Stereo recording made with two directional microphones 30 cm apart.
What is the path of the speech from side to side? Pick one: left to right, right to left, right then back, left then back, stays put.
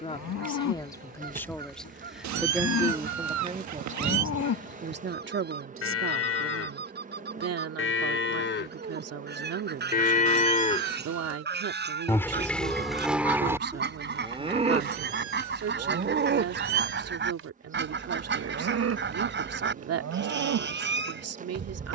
left to right.